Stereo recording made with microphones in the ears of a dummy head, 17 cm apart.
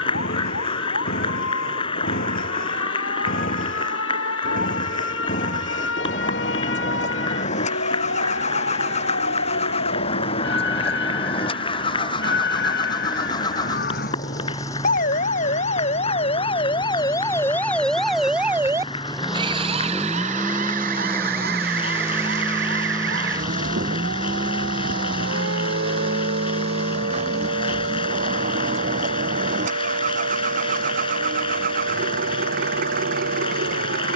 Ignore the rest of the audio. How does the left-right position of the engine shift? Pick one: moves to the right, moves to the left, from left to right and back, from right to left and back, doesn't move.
moves to the right.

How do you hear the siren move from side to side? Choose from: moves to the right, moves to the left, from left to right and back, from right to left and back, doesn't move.
moves to the right.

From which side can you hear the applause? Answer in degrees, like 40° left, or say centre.
30° left.